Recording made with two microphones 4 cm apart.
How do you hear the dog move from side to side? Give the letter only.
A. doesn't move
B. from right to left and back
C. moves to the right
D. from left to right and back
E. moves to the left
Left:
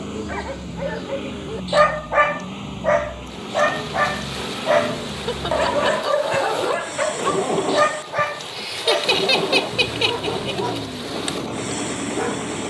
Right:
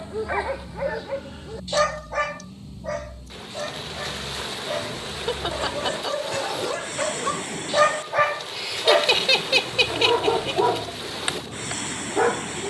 B.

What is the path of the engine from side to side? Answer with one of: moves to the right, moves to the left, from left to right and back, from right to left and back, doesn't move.
doesn't move.